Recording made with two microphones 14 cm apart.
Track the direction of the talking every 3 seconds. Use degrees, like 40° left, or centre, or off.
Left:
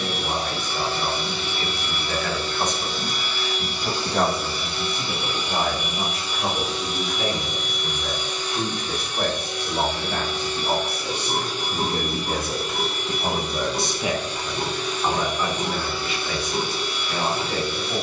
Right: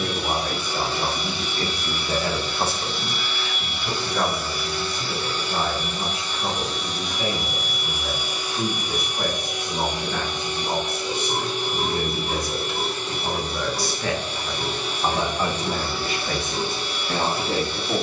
40° right, 50° left, 80° left, 70° left, 30° left, 50° right.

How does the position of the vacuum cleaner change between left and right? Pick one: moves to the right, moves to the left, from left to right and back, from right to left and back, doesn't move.
moves to the right.